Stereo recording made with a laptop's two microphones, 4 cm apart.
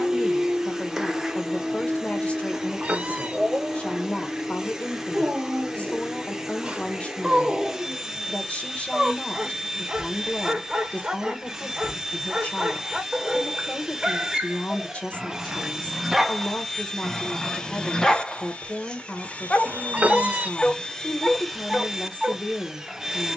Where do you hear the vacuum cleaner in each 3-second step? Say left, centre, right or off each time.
centre, centre, centre, centre, centre, centre, left, centre.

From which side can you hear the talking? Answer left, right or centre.
left.